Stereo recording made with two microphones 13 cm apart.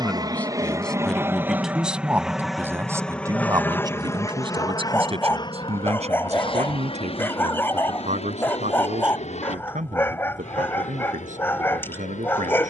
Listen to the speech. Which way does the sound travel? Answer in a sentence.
You can hear the speech move to the right.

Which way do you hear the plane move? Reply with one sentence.
You can hear the plane travel towards the left.